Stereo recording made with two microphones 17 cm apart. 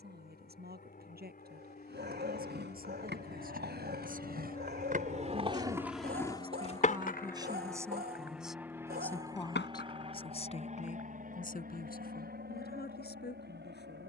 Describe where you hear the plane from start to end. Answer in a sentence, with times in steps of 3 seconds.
In this clip you hear the plane on the left from 0 s, in the centre from 6 s and on the right from 9 s.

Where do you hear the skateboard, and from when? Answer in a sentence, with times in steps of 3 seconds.
In this clip you hear the skateboard on the right from 0 s, on the left from 6 s and not at all from 12 s.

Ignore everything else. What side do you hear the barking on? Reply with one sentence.
In this clip you hear the barking on the right.